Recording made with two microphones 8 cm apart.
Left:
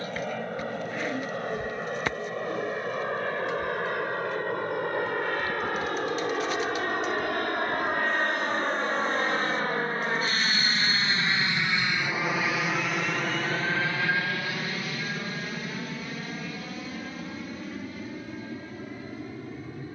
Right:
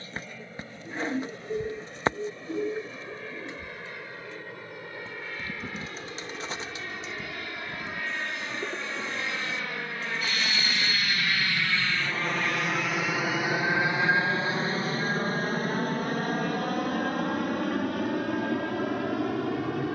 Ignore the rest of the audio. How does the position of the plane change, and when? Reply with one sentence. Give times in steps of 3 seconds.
You can hear the plane on the left from 0 s, in the centre from 12 s and on the right from 15 s.